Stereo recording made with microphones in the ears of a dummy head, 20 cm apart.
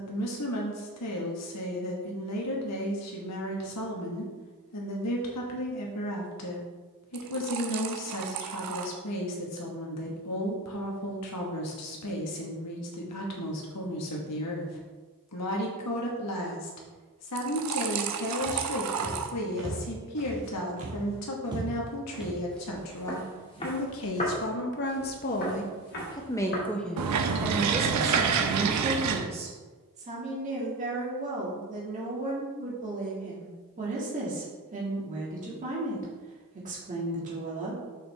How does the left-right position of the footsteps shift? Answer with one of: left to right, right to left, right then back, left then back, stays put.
right to left.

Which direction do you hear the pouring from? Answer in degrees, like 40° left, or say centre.
80° right.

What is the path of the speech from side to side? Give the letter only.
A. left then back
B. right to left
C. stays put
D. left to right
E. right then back
D.